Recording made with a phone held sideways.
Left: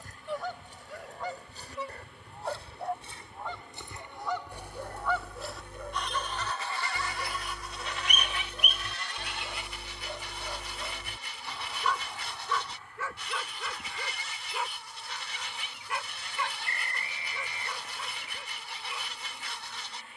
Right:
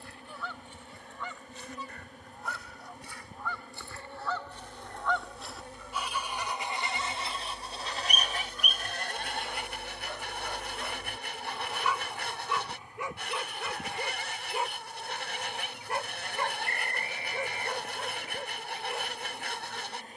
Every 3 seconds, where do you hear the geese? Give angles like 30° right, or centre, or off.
40° left, 10° left, 30° right, 60° right, 60° right, 60° right, 60° right.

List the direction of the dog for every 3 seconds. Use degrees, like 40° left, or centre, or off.
70° left, 60° left, 40° left, 10° left, 20° right, 40° right, 50° right.